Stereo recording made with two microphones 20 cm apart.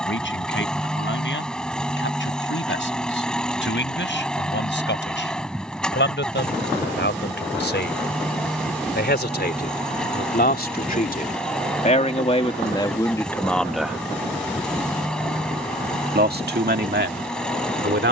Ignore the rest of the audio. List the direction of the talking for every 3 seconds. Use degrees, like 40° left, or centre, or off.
70° left, 70° left, 70° left, 50° left, 20° left, 60° right.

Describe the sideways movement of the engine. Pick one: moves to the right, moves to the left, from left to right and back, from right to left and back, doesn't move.
doesn't move.